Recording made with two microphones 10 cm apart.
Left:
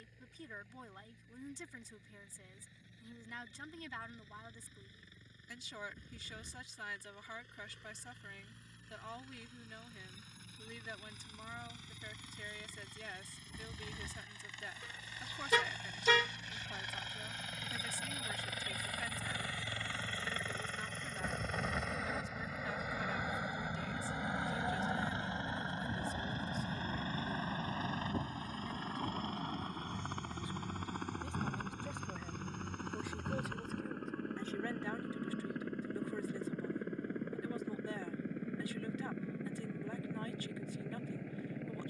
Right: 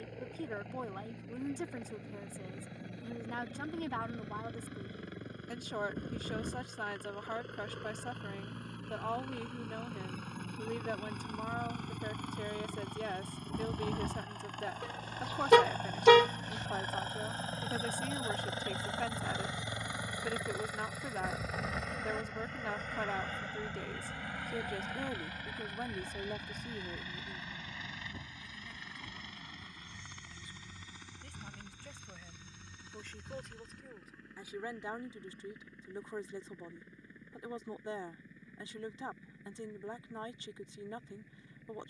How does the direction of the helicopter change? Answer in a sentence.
In this clip you hear the helicopter travel towards the left.